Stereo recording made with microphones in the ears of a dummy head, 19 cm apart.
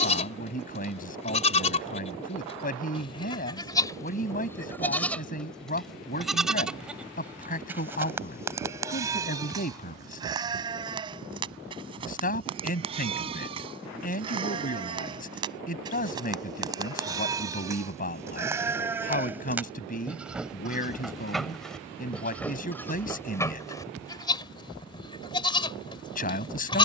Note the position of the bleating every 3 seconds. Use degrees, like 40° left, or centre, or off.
30° left, 10° left, 10° right, 20° right, 30° right, 20° right, 10° right, 10° left, 20° left.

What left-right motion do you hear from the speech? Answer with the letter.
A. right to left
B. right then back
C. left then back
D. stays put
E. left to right
D.